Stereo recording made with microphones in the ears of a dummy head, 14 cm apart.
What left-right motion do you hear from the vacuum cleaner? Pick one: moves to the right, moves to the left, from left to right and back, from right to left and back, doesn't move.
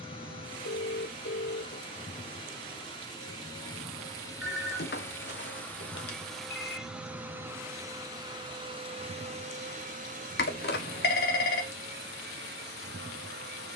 moves to the right.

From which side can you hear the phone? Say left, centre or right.
left.